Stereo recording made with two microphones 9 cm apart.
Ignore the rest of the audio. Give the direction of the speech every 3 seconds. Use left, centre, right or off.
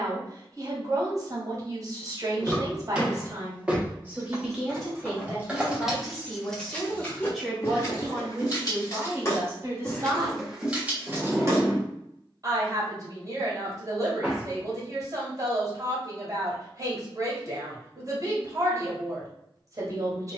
right, centre, centre, right, right, right, right.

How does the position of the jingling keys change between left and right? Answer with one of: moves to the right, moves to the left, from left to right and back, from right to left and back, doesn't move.
from right to left and back.